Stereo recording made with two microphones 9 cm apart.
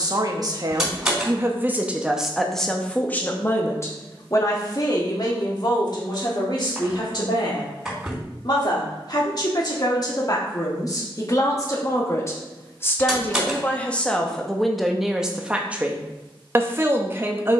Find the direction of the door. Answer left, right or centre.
centre.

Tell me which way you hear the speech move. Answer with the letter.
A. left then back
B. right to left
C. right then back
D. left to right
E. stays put
A.